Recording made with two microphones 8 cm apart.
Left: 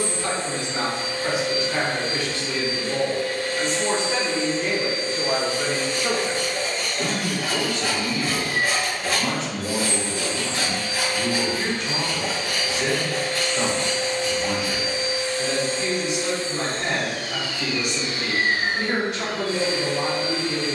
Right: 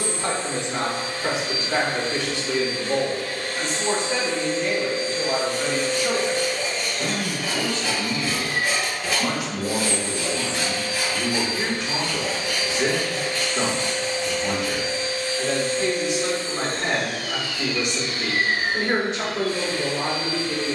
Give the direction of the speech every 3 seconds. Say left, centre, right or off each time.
right, centre, left, right, right, right, right.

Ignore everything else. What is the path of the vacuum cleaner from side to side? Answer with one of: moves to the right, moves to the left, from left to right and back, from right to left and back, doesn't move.
moves to the left.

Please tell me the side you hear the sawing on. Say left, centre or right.
left.